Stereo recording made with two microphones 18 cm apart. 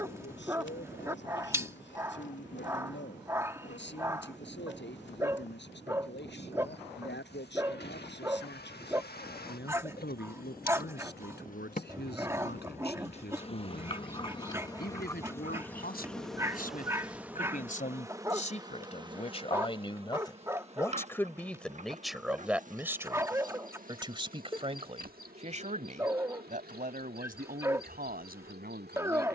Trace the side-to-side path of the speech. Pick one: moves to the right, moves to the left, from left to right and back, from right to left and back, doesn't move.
moves to the right.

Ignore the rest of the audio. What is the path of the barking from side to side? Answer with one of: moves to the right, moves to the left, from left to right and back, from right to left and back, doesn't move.
doesn't move.